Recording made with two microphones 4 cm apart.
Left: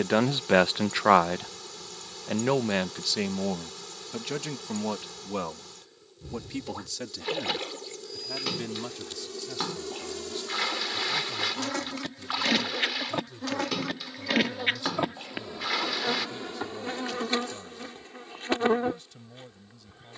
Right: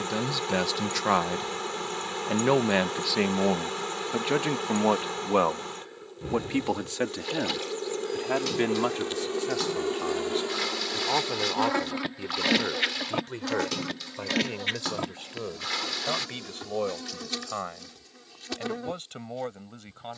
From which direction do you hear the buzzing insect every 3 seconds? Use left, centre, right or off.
right, right, right, right, centre, left, left.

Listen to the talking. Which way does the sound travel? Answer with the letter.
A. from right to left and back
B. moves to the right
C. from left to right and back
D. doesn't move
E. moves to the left
B.